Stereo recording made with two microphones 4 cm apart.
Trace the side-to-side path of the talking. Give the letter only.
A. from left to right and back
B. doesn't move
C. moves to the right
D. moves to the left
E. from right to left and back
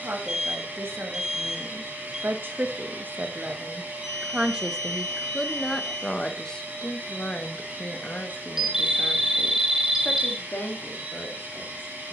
D.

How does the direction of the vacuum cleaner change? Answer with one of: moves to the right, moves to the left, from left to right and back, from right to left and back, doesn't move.
doesn't move.